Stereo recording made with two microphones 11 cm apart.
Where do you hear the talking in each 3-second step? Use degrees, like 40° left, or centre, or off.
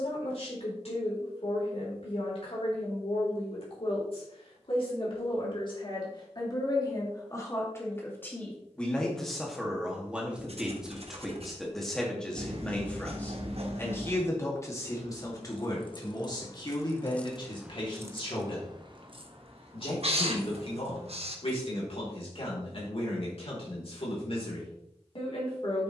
60° left, 50° left, 30° left, centre, 20° left, 40° left, 50° left, 60° left, 60° left.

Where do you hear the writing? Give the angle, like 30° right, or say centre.
60° right.